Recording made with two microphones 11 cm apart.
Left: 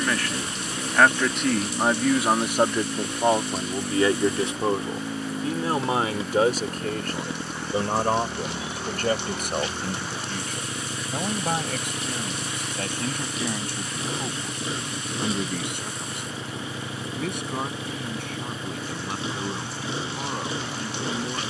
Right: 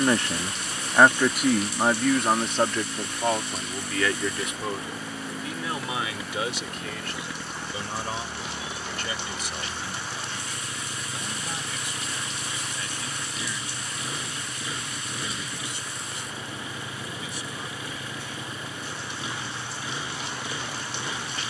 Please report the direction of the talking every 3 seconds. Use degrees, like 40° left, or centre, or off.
centre, 30° left, 50° left, 60° left, 60° left, 60° left, 60° left.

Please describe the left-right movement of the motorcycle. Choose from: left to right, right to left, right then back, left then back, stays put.
stays put.